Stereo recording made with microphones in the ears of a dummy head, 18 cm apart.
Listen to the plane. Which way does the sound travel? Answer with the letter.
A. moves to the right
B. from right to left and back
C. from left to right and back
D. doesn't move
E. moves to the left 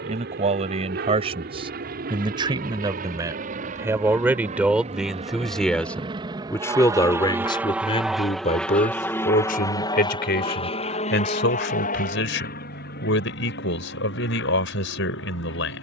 E.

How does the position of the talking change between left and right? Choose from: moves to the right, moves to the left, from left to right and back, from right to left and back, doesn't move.
moves to the left.